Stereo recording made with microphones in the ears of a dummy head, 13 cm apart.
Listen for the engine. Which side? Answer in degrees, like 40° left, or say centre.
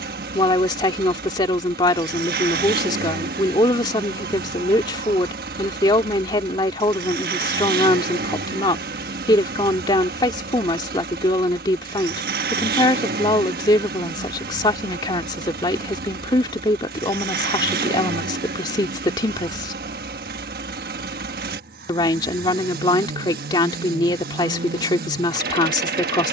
70° right.